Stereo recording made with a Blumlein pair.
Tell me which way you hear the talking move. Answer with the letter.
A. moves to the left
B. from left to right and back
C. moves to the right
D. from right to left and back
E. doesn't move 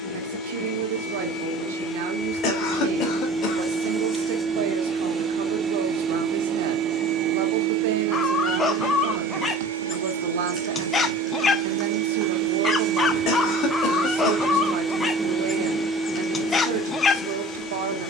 E.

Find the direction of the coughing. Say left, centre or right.
left.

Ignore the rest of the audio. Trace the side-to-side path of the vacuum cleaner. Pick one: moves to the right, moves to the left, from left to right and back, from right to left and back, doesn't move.
from left to right and back.